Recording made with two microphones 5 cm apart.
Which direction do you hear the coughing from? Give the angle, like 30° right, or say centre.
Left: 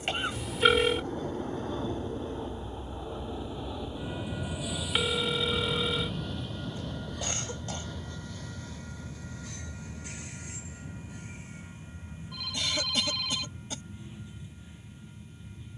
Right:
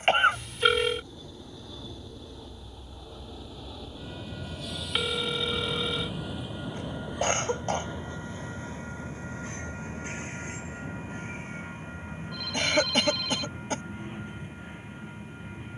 50° right.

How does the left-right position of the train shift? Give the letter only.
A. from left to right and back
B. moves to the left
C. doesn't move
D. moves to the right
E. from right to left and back
D.